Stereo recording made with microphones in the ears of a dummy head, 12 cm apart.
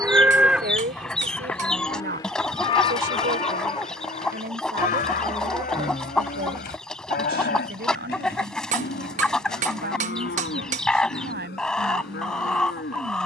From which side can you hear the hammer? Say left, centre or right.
right.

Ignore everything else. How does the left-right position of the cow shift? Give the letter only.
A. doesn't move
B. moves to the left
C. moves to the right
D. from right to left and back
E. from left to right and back
B.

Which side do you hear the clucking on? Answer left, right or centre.
centre.